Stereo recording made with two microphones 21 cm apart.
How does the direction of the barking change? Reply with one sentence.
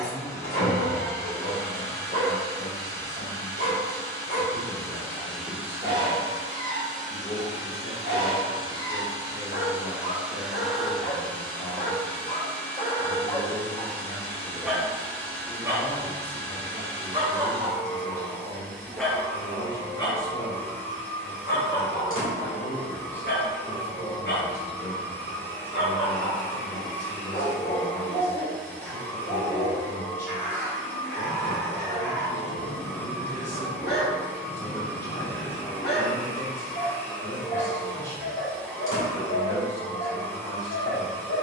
In this clip you hear the barking go right and come back.